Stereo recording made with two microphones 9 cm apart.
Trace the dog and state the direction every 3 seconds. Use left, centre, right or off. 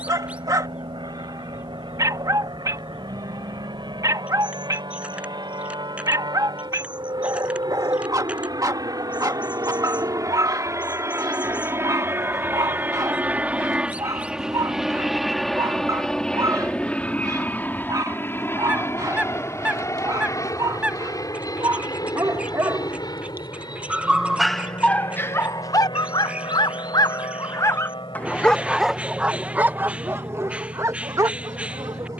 right, right, right, right, right, right, right, right, left, centre, right.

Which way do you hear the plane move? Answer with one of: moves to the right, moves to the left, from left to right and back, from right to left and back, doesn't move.
moves to the left.